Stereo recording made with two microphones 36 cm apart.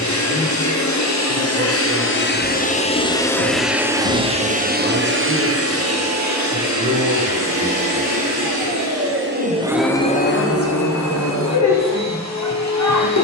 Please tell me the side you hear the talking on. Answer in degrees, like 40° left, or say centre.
40° right.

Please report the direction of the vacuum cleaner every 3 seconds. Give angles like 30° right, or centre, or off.
40° left, 20° right, 50° right, 20° left, 50° left.